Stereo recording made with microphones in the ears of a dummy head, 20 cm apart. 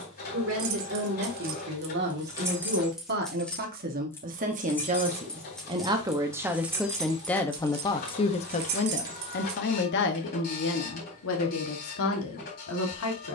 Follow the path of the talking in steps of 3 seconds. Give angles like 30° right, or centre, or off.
50° right, 40° right, 10° left, 60° left, 70° left.